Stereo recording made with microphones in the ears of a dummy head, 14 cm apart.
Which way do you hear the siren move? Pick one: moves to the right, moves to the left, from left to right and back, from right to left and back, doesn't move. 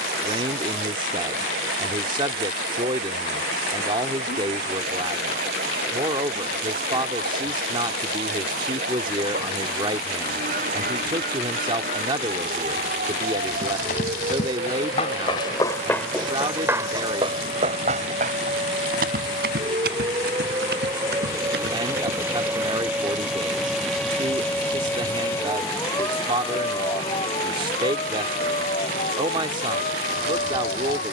moves to the left.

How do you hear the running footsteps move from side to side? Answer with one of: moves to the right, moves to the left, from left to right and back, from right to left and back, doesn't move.
moves to the right.